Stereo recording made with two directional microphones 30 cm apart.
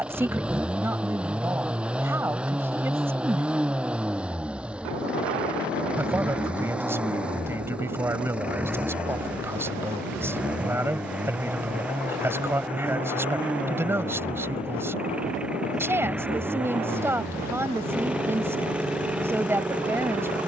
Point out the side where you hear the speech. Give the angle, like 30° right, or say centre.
10° right.